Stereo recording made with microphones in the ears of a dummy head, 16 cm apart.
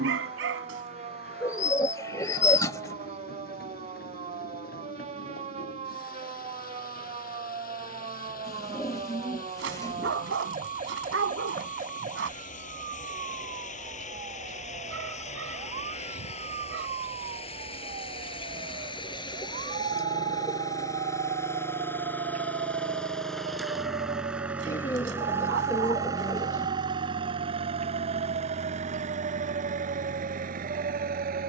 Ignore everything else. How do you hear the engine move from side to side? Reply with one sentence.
You can hear the engine go from the left side to the right.